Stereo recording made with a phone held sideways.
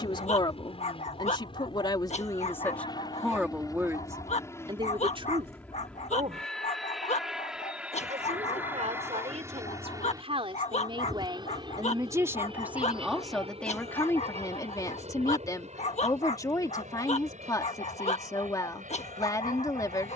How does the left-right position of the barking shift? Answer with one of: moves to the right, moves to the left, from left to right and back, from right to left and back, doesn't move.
doesn't move.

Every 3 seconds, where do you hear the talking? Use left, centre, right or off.
left, right, right, right, centre, left, left.